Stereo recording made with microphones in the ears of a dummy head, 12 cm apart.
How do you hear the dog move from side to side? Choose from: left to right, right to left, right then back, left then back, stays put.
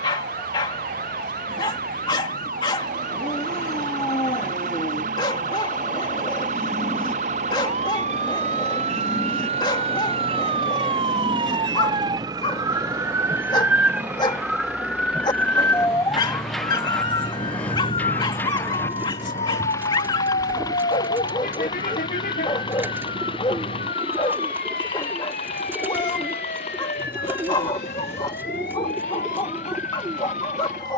stays put.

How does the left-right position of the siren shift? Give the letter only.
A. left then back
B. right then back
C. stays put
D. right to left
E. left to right
D.